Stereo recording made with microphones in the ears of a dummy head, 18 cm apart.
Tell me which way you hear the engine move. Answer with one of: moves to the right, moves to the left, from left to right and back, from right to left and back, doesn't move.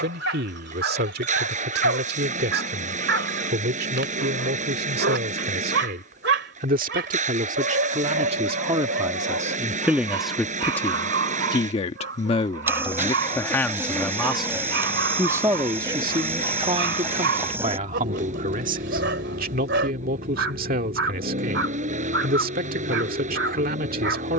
doesn't move.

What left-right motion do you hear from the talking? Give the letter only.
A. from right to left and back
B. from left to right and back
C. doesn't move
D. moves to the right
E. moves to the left
A.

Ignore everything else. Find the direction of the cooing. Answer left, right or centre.
centre.